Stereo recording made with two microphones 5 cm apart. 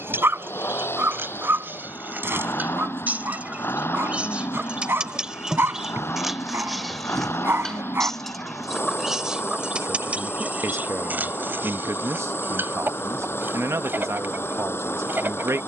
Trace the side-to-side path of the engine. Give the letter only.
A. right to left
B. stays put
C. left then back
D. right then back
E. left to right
B.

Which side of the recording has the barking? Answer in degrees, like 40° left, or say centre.
50° right.